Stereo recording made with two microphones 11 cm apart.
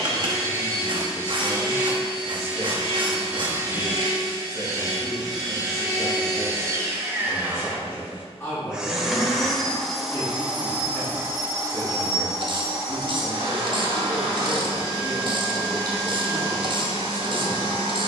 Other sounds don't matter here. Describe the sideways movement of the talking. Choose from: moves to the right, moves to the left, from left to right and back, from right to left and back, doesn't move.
doesn't move.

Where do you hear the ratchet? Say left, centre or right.
right.